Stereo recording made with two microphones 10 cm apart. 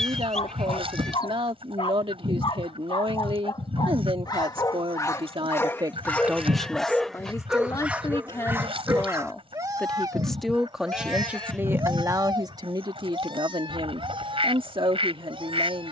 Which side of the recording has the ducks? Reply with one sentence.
In this clip you hear the ducks on the right.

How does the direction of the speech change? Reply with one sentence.
You can hear the speech go left and come back.